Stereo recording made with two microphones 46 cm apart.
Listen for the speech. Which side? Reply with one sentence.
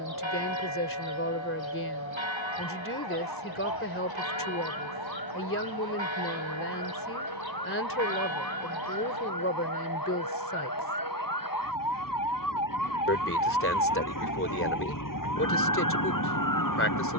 You can hear the speech on the left.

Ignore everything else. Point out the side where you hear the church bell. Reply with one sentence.
You can hear the church bell on the right.